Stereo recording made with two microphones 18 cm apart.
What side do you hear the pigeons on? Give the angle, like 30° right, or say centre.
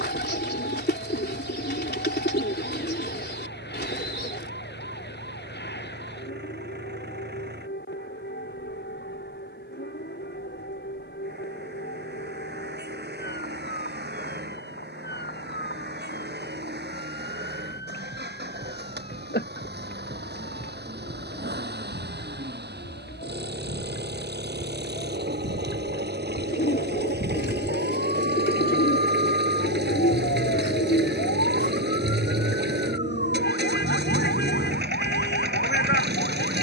70° left.